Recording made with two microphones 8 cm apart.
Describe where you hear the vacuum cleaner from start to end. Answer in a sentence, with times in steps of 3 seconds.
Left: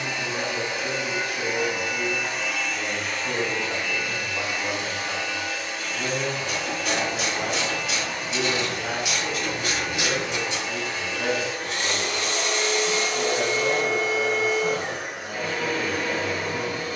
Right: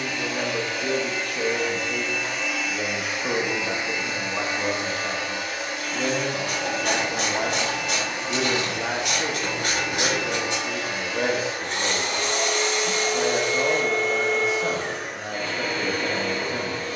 You can hear the vacuum cleaner in the centre from 0 s, on the right from 3 s and in the centre from 12 s.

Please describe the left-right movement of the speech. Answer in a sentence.
You can hear the speech stay in one place.